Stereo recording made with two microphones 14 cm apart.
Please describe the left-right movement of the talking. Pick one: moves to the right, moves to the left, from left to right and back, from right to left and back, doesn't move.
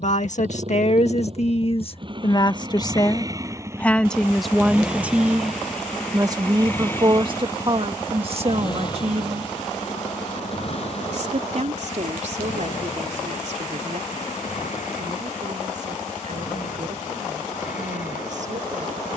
moves to the right.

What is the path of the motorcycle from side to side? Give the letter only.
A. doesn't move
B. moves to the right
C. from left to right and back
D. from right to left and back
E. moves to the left
E.